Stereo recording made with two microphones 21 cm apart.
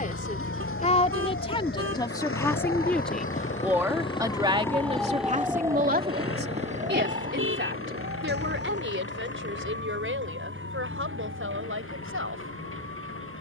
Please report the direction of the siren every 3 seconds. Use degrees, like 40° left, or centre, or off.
60° left, 10° left, 40° right, 60° right, 70° right.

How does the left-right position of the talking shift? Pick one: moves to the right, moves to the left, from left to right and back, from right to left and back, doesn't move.
moves to the right.